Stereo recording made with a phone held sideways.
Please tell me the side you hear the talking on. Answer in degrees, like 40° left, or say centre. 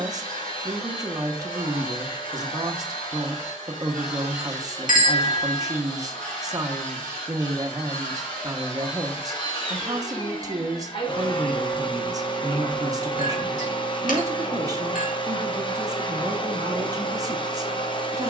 30° right.